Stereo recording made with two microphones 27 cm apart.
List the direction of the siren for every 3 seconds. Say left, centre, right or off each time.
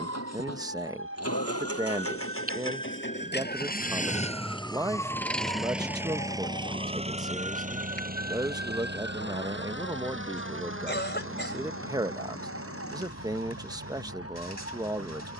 right, centre, left, left, left.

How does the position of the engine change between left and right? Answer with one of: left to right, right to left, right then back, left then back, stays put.
left to right.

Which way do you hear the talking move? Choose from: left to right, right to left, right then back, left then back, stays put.
stays put.